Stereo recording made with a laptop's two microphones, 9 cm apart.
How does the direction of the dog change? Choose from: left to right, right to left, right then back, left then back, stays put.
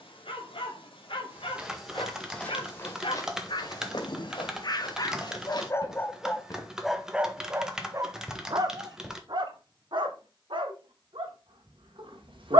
left to right.